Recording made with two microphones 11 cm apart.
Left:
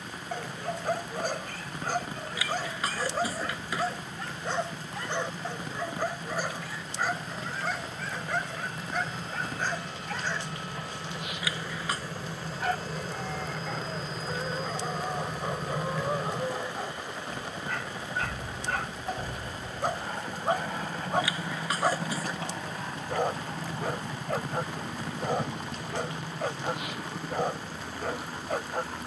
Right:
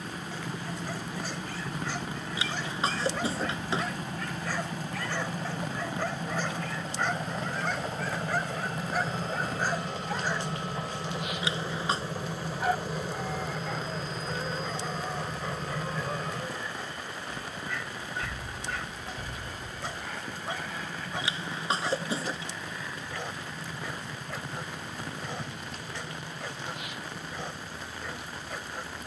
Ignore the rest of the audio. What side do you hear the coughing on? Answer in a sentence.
In this clip you hear the coughing on the right.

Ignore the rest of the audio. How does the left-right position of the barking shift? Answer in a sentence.
You can hear the barking go right and come back.